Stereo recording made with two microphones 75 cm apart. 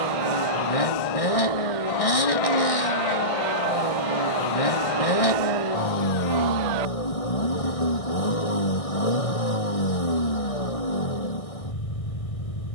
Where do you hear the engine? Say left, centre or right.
left.